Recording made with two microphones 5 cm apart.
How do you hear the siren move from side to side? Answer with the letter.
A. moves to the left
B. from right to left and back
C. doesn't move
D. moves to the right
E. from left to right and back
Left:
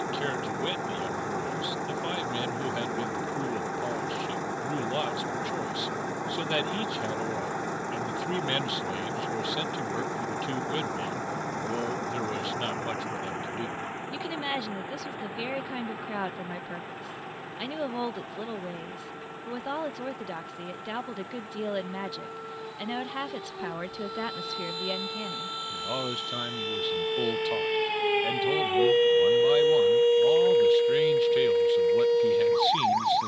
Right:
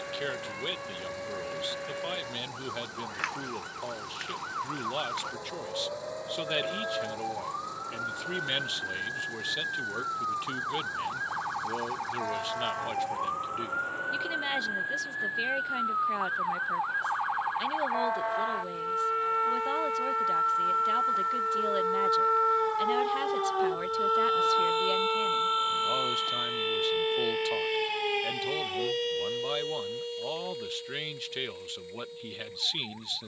A.